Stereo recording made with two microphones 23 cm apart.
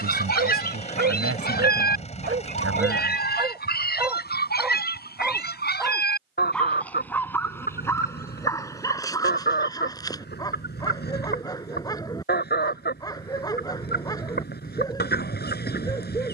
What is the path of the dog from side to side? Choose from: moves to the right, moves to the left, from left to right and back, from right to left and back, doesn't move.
moves to the left.